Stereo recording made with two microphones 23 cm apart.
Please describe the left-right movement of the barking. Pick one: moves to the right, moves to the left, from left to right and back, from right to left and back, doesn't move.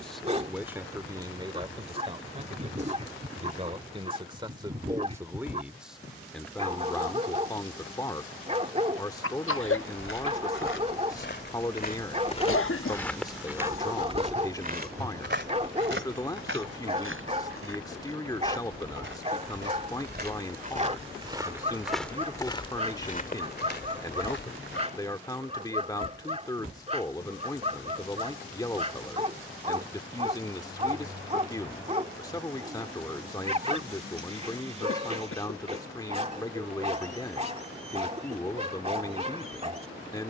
doesn't move.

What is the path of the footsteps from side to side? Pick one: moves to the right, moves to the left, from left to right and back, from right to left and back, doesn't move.
from left to right and back.